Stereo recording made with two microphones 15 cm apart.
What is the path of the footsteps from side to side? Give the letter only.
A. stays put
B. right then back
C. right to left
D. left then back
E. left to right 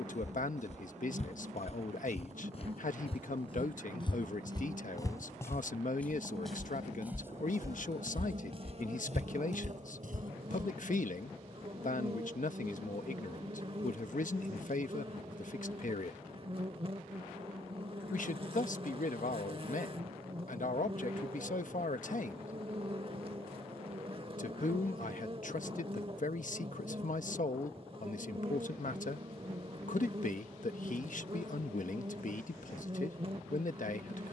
E.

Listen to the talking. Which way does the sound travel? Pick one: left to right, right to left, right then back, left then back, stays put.
stays put.